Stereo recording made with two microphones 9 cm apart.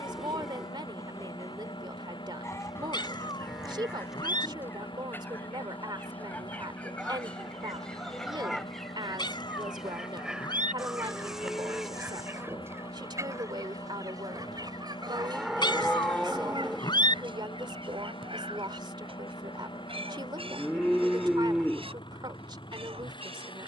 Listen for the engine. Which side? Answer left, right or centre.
left.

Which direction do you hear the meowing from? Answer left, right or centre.
left.